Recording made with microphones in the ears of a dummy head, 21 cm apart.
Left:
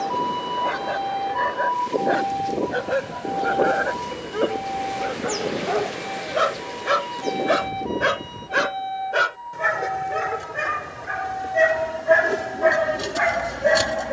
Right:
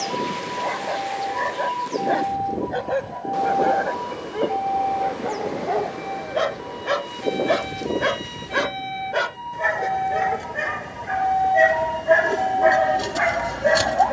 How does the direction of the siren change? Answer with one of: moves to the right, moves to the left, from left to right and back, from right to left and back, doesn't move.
moves to the right.